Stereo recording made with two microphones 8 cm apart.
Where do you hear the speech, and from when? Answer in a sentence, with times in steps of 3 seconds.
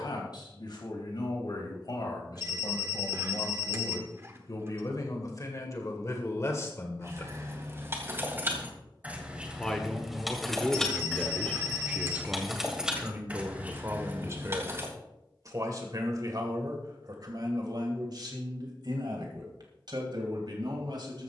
You can hear the speech on the left from 0 s, in the centre from 9 s and on the right from 12 s.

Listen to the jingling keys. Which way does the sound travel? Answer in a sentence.
You can hear the jingling keys go left and come back.